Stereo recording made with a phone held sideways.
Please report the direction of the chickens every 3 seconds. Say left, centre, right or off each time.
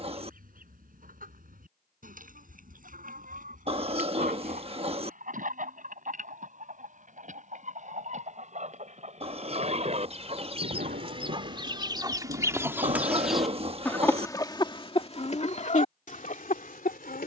right, right, right, right, centre, left.